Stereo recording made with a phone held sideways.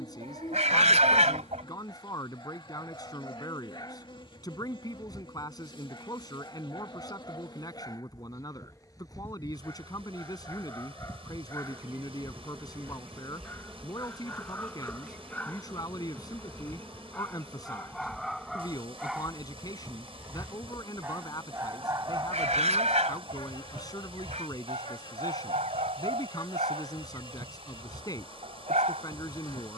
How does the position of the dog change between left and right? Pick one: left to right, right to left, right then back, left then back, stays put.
left to right.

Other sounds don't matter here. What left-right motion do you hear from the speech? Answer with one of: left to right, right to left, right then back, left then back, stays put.
stays put.